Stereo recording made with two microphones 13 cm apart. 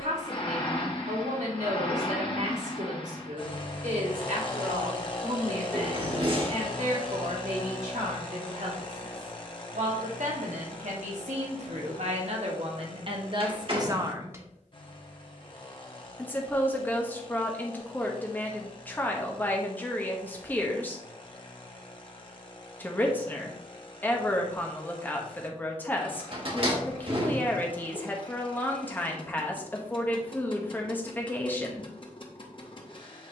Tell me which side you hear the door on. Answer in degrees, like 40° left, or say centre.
40° right.